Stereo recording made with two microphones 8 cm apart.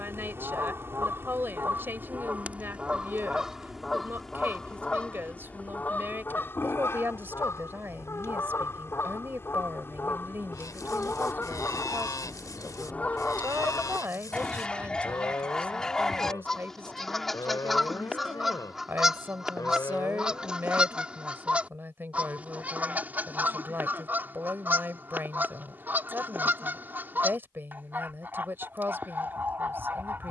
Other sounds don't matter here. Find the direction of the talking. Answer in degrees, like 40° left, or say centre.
30° right.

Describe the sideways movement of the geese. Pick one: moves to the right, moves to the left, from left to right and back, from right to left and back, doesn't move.
from right to left and back.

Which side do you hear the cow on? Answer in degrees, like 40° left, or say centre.
40° left.